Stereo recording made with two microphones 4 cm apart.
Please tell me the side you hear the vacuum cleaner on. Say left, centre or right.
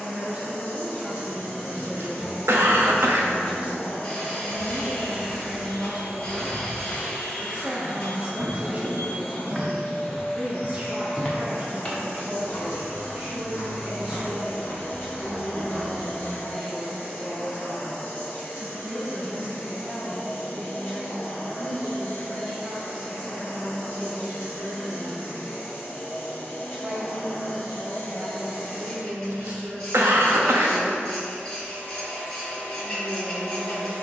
left.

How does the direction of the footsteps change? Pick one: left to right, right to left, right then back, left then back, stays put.
right then back.